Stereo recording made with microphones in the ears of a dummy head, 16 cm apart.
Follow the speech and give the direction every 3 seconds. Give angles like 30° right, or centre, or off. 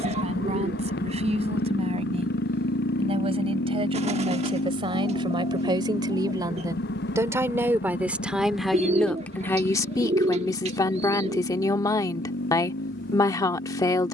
40° right, 30° right, 10° right, 20° left, 20° left.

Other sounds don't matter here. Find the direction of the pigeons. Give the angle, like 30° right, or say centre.
40° right.